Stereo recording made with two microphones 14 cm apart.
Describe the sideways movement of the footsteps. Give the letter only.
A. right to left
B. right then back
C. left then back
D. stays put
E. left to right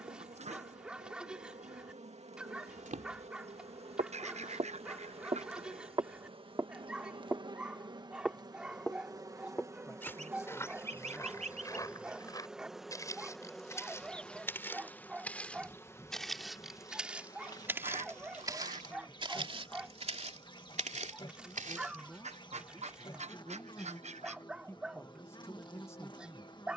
C.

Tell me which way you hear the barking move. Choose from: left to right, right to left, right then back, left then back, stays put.
stays put.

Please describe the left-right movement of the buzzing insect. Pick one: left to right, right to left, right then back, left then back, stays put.
right to left.